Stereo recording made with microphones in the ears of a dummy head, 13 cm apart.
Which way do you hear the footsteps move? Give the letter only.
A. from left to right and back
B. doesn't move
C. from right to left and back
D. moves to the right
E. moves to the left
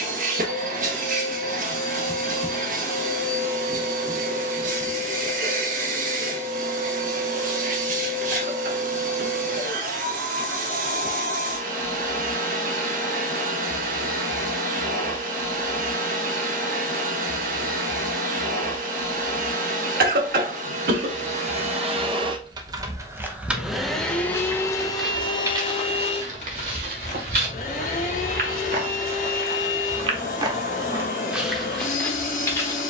A.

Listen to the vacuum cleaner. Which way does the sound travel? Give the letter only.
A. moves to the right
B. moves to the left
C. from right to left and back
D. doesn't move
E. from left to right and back
B.